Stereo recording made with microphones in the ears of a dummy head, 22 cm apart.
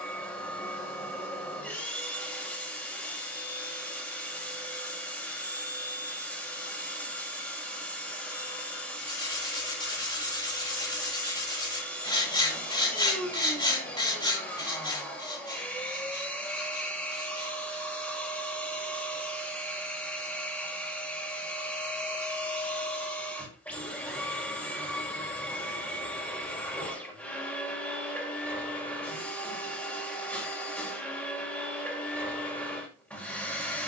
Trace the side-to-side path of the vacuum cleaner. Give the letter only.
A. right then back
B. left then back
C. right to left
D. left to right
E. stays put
E.